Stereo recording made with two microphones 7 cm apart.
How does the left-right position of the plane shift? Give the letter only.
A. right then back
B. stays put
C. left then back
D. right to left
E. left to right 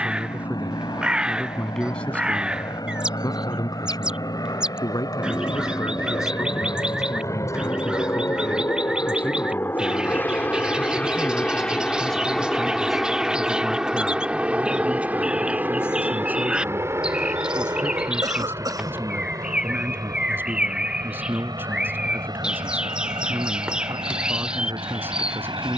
E.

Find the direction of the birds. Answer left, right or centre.
centre.